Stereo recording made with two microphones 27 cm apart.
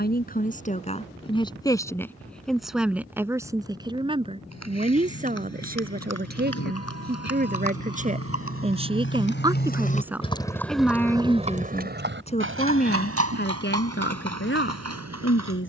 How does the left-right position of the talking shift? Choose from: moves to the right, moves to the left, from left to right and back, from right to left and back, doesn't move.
from left to right and back.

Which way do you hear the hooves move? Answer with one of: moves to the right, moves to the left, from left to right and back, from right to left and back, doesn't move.
moves to the right.